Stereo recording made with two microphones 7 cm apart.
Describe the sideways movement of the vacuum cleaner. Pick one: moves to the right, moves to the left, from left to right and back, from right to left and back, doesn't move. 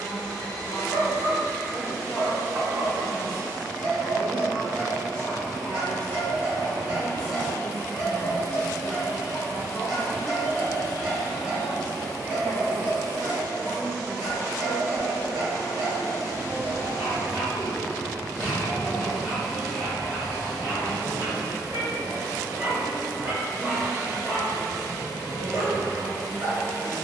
moves to the right.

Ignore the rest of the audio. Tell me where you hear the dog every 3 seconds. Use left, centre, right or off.
right, right, centre, centre, right, right, right, right, right.